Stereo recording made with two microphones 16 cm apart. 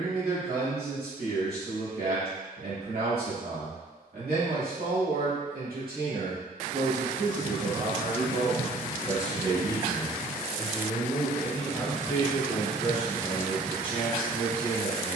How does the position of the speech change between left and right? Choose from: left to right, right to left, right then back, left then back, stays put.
right to left.